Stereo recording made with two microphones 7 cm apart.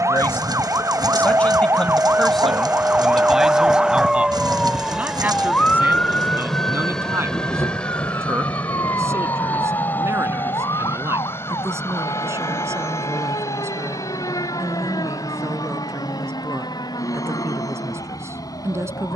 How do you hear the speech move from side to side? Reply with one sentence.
You can hear the speech travel towards the right.